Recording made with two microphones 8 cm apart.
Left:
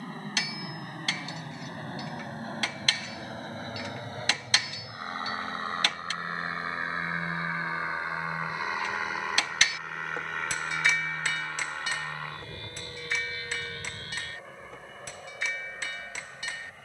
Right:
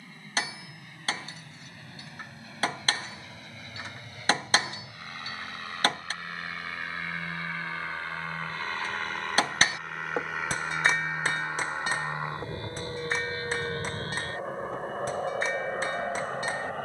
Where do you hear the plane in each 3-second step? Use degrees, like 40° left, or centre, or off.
50° left, 40° left, 20° left, centre, 30° right, 50° right.